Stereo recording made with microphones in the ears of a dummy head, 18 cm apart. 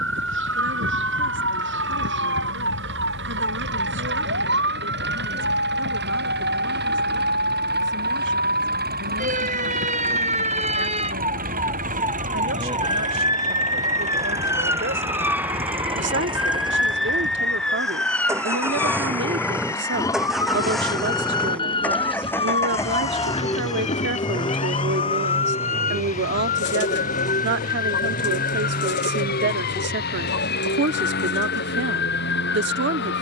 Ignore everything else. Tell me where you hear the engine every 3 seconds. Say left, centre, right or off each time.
right, right, right, right, right, right, centre, centre, left, left, left.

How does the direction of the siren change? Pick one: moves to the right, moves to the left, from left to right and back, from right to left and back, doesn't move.
moves to the left.